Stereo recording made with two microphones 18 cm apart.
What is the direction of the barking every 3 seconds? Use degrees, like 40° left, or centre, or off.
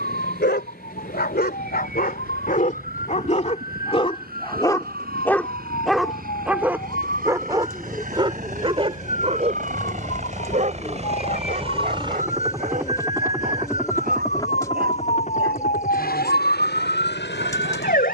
60° left, 20° left, 20° right, 40° right, 50° right, 60° right.